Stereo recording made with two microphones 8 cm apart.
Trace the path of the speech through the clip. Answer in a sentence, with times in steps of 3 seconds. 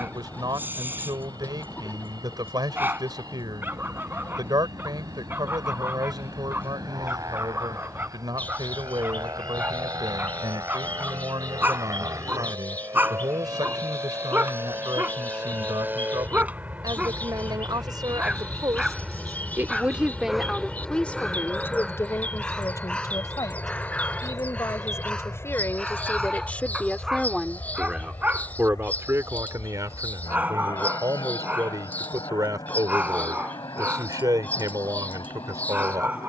In this clip you hear the speech on the right from 0 s, on the left from 21 s and on the right from 27 s.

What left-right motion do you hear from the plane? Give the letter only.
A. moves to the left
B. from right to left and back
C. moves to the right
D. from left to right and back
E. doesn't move
A.